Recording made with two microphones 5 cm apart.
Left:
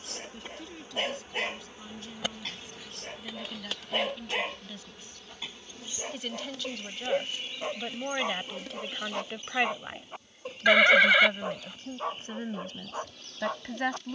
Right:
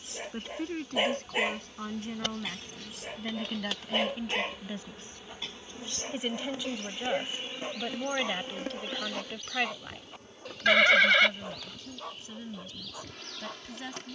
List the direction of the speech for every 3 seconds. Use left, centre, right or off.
right, right, centre, left, left.